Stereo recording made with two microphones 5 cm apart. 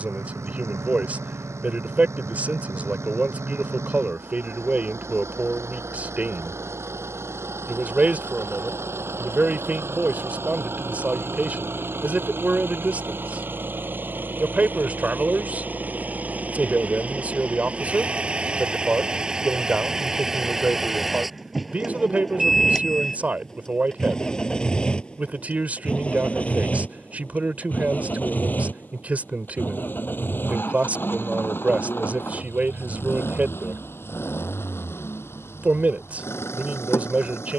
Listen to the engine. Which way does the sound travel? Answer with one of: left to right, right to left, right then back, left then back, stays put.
right to left.